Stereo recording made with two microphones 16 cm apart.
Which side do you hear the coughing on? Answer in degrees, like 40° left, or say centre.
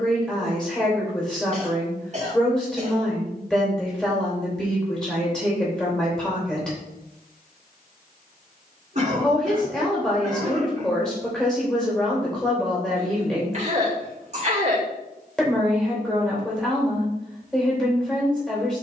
40° right.